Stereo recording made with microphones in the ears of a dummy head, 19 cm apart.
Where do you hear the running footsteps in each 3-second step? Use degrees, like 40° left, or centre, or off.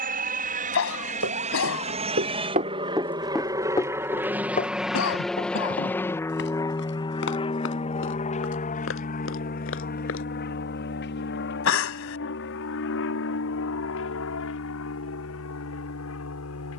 50° right, 30° left, 60° left, 60° left, off, off.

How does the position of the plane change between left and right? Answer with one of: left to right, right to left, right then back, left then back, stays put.
right to left.